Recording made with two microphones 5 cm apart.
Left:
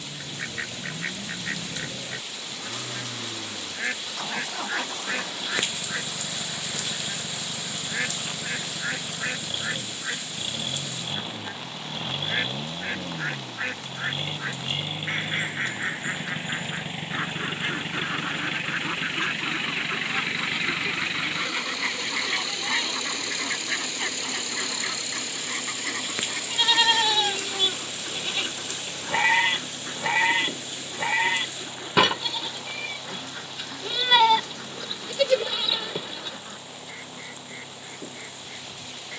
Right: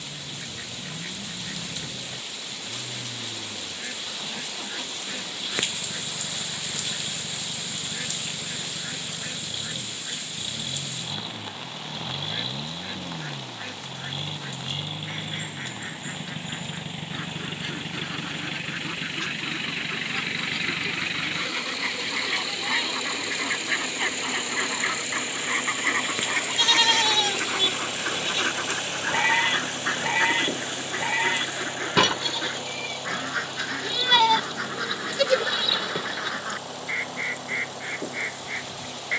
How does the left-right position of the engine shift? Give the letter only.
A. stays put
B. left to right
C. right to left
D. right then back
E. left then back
B.